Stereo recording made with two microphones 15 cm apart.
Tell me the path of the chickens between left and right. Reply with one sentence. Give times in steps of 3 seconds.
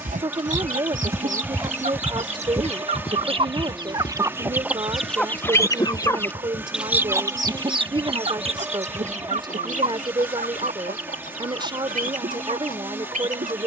You can hear the chickens on the right from 0 s, in the centre from 3 s and on the right from 6 s.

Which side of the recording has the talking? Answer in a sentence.
You can hear the talking on the right.